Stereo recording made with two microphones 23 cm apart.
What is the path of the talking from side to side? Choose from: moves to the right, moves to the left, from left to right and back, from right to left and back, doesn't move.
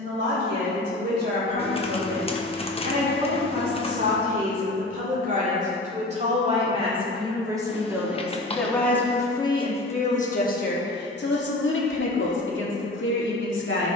moves to the left.